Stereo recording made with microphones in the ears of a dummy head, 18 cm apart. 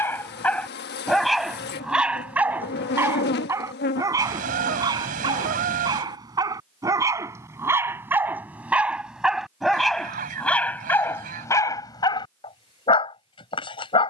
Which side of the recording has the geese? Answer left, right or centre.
right.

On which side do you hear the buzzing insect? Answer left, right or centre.
left.